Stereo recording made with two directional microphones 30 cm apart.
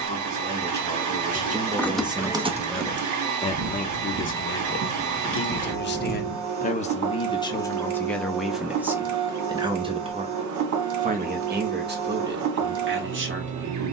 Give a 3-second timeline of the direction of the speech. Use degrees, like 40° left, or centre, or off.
20° right, 40° left, 10° left, 20° right, 40° right.